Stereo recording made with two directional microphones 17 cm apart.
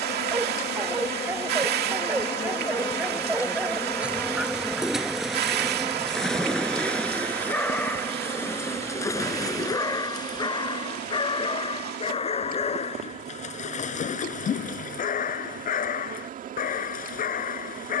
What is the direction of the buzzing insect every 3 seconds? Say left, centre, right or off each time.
left, centre, right, right, right, right.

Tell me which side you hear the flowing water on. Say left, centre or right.
right.